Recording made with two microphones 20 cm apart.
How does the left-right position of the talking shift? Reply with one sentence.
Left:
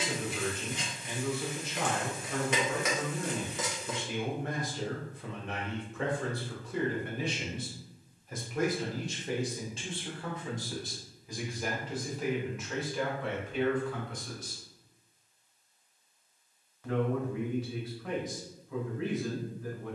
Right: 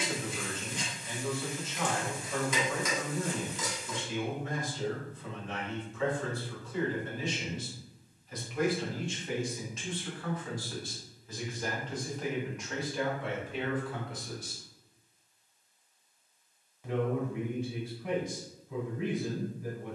You can hear the talking move from left to right.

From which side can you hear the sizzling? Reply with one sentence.
In this clip you hear the sizzling on the left.